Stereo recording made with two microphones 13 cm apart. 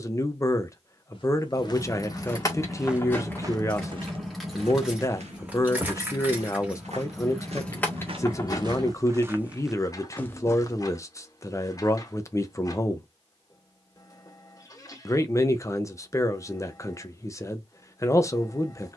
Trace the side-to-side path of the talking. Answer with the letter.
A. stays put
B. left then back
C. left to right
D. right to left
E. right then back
A.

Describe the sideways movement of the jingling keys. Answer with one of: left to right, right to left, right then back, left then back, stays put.
right then back.